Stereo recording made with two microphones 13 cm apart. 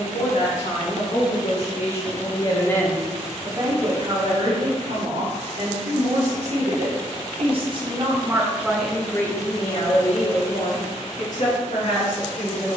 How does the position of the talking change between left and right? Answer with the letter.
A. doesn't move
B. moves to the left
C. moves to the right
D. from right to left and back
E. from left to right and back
E.